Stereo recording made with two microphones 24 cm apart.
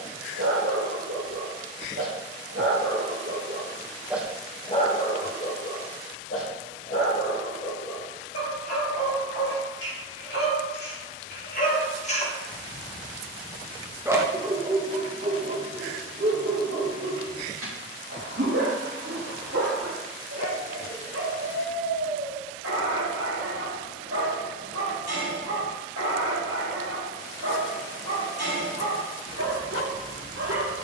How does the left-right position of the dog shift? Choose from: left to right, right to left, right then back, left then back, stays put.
left then back.